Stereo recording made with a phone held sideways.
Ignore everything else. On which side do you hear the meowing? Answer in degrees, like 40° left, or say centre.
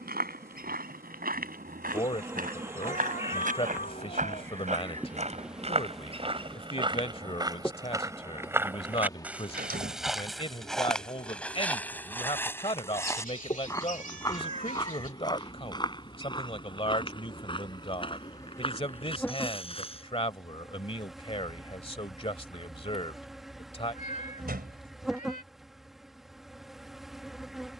60° left.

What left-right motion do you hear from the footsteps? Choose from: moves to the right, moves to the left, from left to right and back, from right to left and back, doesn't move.
moves to the left.